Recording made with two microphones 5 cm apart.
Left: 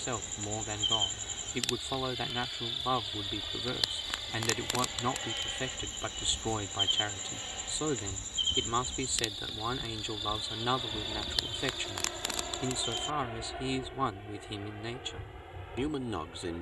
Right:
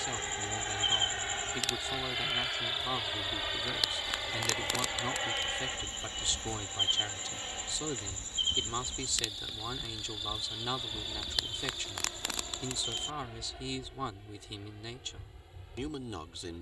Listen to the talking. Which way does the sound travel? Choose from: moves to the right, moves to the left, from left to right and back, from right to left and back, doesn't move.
doesn't move.